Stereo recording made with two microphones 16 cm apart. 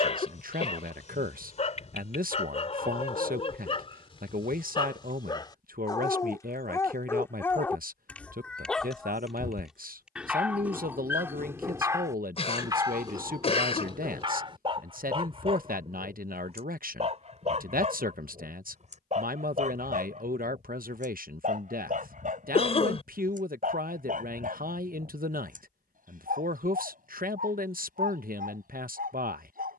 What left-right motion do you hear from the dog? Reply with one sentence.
In this clip you hear the dog go from the left side to the right.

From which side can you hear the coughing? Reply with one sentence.
You can hear the coughing on the left.